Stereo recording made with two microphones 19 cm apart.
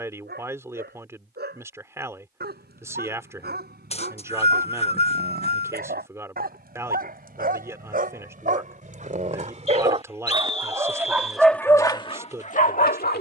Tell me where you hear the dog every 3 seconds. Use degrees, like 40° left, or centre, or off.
60° right, 60° right, 50° right, 20° right, 50° left.